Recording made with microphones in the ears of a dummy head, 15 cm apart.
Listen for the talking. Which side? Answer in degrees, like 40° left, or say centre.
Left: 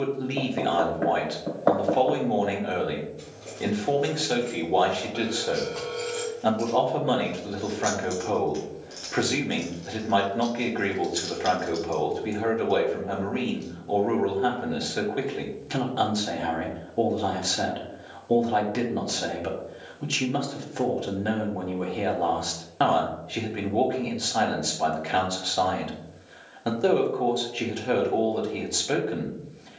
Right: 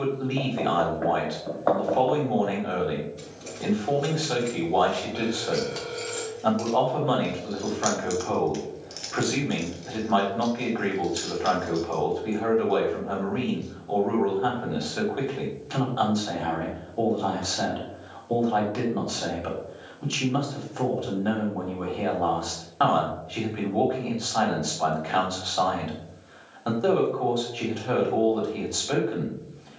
20° left.